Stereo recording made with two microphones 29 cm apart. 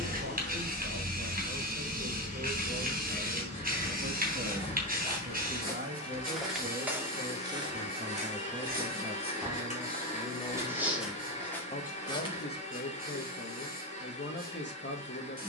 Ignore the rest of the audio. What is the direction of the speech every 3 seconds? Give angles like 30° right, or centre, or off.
50° right, 40° right, 20° right, 10° left, 40° left.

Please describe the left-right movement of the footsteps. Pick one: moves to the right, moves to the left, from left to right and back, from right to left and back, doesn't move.
from left to right and back.